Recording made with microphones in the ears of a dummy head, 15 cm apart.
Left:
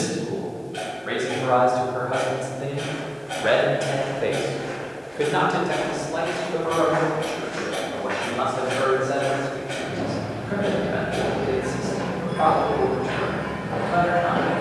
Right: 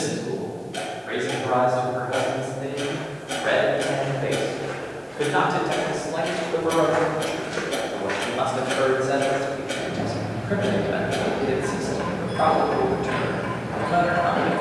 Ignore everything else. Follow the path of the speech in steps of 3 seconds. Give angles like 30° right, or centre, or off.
60° left, 30° left, 20° right, 40° right, 40° right.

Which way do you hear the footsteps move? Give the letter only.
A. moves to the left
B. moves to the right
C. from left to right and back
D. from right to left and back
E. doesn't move
C.